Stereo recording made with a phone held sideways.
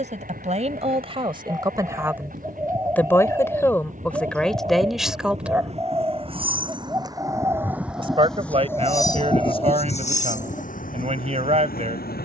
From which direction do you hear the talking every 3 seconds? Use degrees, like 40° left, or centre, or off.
30° right, 10° left, 40° right, 40° right.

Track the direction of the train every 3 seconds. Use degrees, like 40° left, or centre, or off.
60° right, 50° right, 10° right, 50° left.